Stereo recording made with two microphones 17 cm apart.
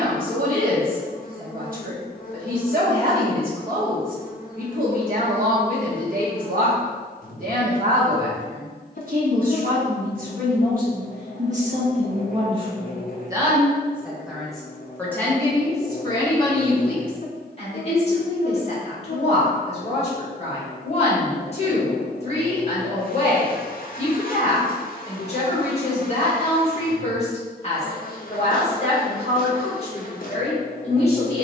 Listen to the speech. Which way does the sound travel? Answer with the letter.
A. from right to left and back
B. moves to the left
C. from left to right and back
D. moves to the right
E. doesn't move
B.